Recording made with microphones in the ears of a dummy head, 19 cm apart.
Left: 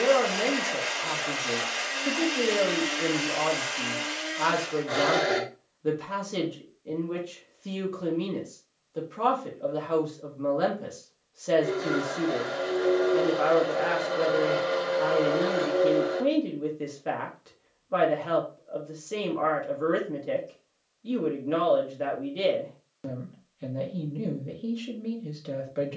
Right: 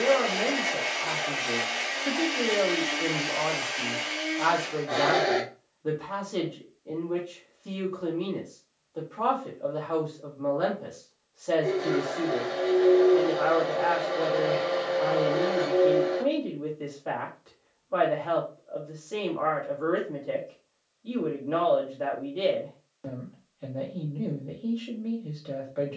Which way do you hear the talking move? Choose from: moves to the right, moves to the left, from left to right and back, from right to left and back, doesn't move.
doesn't move.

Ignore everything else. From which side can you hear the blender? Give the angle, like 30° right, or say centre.
40° left.